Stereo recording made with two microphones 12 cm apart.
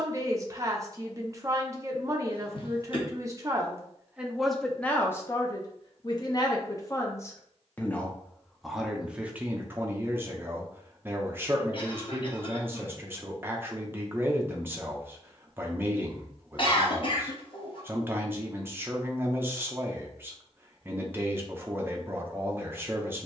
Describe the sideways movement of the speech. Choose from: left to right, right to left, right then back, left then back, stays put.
left then back.